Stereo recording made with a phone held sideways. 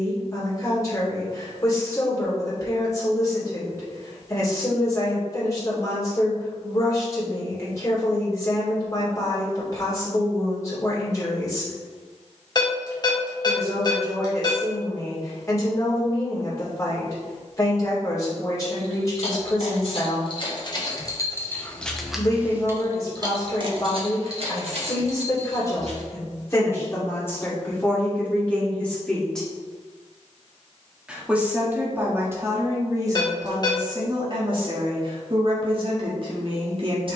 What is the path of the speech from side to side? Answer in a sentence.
You can hear the speech move from left to right.